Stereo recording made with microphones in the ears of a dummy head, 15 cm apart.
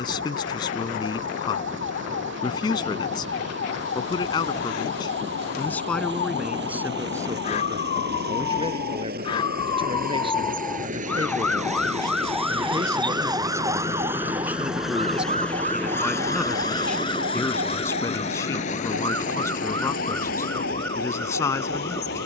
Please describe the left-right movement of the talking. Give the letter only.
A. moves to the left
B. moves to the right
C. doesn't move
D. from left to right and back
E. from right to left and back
D.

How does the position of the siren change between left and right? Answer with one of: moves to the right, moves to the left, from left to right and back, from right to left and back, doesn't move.
moves to the right.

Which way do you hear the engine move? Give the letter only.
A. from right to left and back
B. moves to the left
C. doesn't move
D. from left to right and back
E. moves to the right
B.